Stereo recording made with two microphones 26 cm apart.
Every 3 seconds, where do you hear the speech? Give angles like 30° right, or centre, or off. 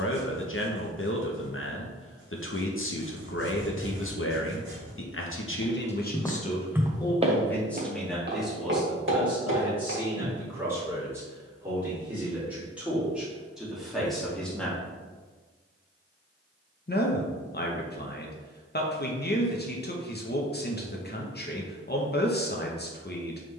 50° left, 50° left, 10° left, 10° right, centre, 40° left, 40° left, 40° left.